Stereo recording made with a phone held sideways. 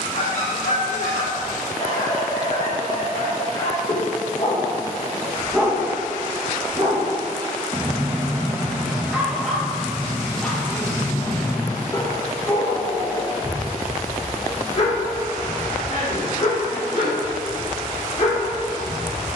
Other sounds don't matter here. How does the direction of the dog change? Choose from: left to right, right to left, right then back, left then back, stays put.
right then back.